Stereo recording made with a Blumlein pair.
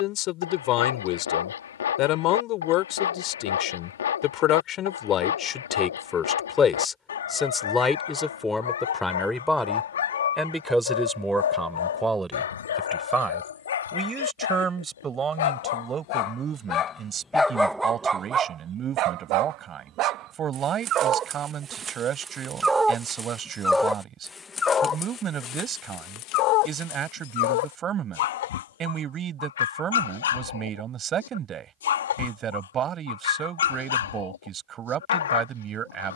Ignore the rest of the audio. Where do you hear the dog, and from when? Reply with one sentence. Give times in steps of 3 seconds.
In this clip you hear the dog on the left from 0 s, on the right from 18 s, in the centre from 21 s and on the left from 24 s.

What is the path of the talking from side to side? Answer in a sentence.
You can hear the talking move from left to right.